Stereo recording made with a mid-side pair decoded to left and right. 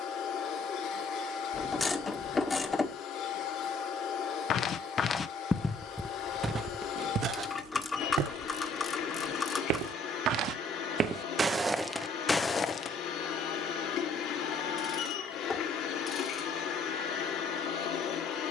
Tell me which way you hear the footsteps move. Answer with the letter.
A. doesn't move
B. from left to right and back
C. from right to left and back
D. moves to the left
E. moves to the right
B.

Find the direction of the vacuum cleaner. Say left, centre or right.
left.